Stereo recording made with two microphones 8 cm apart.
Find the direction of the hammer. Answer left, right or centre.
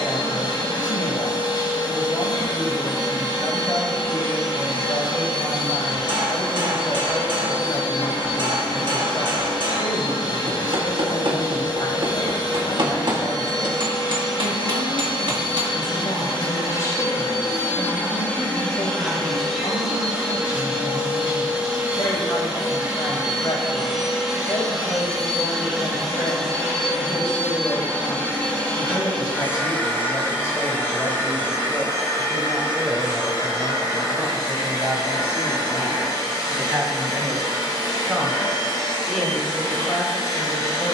right.